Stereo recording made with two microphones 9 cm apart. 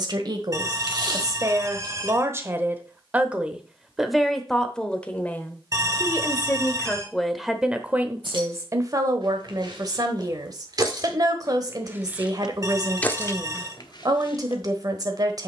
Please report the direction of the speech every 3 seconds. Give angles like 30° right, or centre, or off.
40° right, centre, centre, 40° right, 40° right.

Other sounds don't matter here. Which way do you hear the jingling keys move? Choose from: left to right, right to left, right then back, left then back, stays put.
right to left.